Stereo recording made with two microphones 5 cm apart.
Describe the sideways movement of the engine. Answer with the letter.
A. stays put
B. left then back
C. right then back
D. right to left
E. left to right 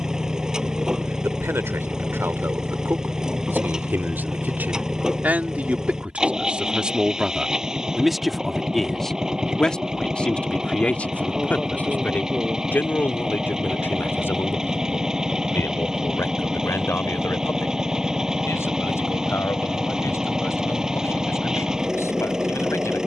A.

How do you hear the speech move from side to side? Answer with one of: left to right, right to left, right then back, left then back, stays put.
right to left.